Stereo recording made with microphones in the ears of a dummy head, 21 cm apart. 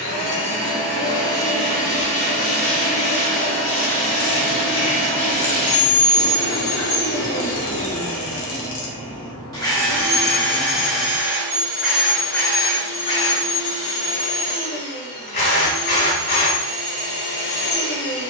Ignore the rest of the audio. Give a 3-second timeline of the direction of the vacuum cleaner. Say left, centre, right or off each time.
left, left, left, centre, left, left.